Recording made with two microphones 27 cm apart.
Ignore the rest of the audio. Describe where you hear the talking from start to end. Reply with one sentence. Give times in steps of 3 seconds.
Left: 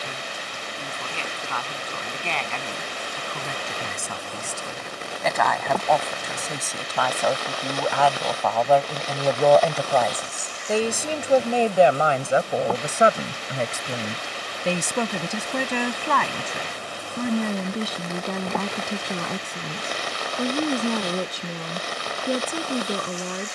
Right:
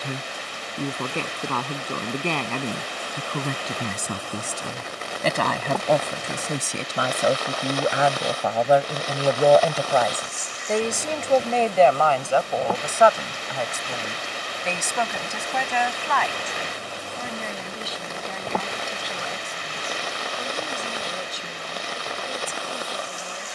In this clip you hear the talking on the right from 0 s, in the centre from 9 s and on the left from 12 s.